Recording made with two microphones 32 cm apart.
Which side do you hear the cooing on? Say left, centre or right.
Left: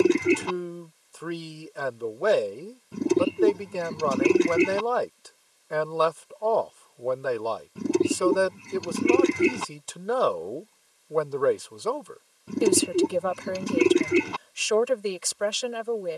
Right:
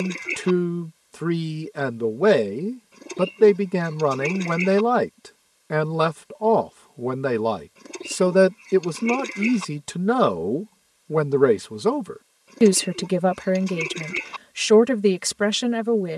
left.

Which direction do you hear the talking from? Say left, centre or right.
right.